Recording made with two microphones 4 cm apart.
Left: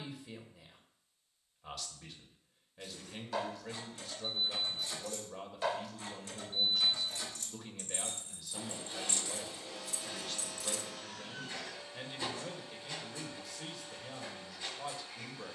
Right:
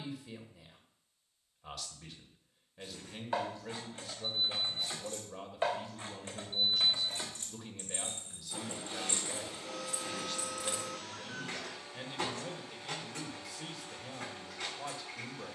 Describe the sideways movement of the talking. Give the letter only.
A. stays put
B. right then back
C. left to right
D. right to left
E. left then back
A.